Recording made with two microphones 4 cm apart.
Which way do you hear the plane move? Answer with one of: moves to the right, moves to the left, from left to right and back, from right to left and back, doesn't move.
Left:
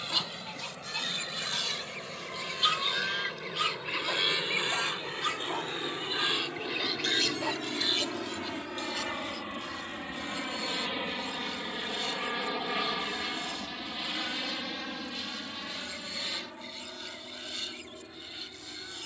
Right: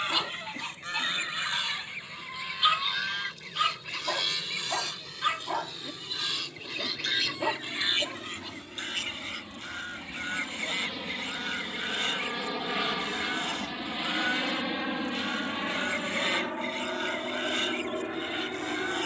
moves to the right.